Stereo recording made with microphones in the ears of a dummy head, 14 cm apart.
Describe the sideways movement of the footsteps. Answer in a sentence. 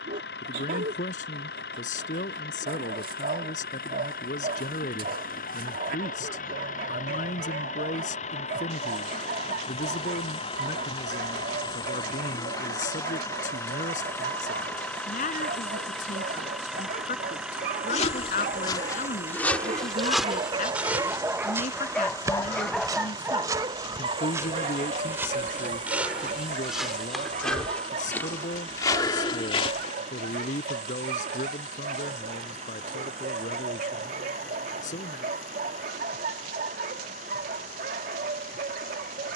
You can hear the footsteps move from left to right and back again.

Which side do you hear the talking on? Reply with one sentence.
In this clip you hear the talking on the left.